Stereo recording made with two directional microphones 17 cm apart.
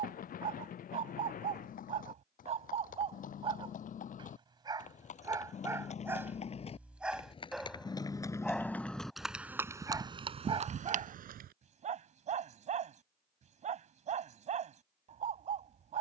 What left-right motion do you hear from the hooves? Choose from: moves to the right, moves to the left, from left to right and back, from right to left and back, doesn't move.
moves to the right.